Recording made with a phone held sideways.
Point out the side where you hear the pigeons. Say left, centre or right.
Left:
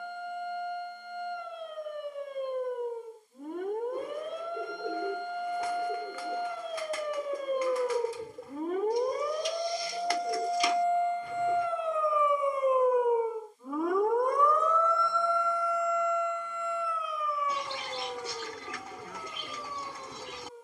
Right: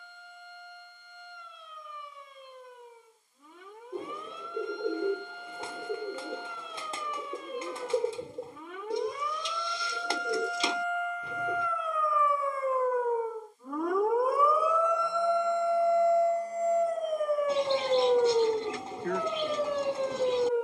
right.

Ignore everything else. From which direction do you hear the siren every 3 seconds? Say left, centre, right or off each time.
left, left, left, left, centre, right, right.